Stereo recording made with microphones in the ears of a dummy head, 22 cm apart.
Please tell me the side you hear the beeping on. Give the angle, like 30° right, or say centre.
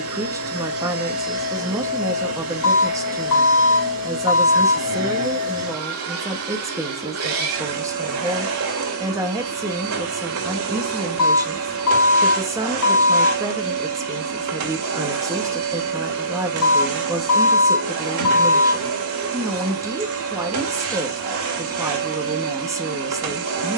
60° left.